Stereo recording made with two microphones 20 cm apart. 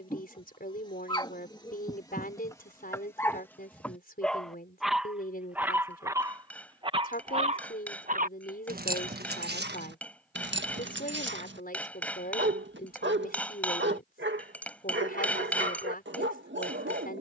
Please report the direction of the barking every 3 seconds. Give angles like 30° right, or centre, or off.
20° left, centre, 30° right, 60° right, 70° right, 70° right.